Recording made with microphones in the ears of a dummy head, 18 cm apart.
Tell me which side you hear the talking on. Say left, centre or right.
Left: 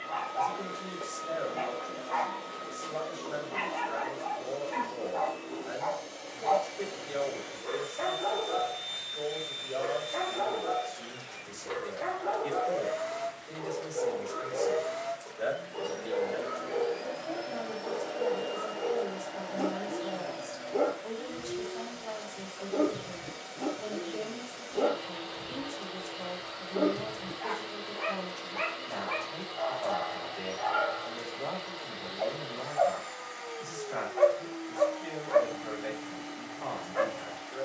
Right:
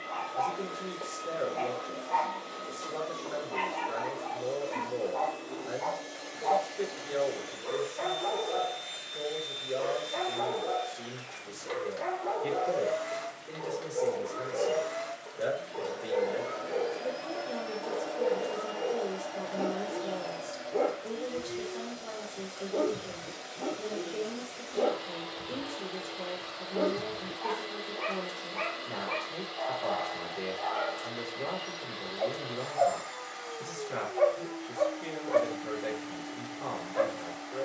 right.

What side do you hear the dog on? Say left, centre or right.
centre.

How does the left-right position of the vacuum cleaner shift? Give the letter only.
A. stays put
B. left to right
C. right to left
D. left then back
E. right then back
A.